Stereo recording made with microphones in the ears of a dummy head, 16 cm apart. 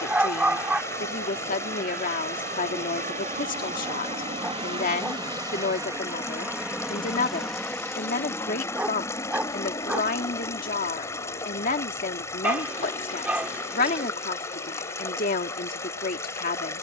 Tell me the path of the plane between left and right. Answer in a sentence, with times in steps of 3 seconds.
In this clip you hear the plane on the right from 0 s, in the centre from 6 s and on the left from 9 s.